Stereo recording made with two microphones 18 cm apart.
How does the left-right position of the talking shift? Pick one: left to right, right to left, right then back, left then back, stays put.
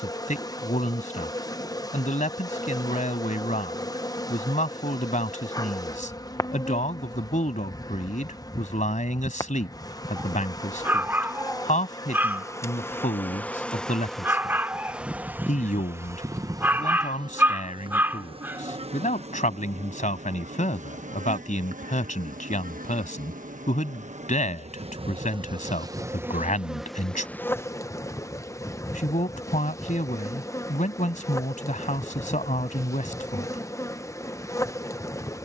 stays put.